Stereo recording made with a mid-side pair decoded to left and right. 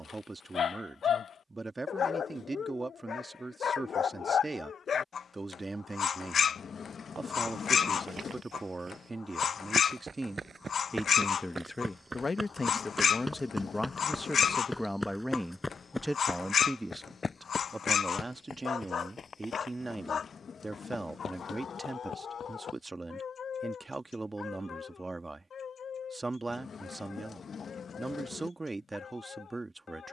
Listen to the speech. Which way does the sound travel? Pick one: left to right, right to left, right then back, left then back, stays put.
left then back.